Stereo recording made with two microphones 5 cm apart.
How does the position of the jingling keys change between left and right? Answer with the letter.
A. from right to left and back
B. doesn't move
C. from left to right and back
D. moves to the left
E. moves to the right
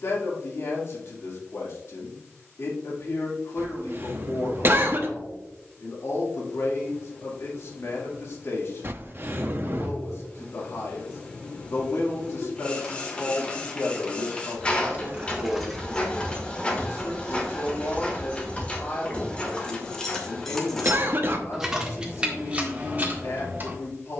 A.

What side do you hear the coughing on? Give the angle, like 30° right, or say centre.
50° right.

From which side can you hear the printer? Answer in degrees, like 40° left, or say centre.
20° left.